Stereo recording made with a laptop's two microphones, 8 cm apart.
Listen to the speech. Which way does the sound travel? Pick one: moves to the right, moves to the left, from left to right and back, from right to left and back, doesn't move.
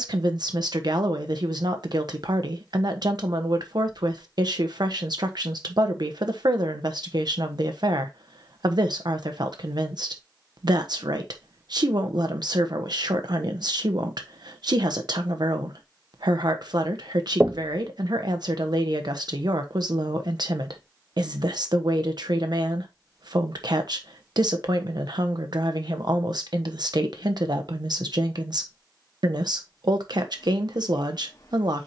doesn't move.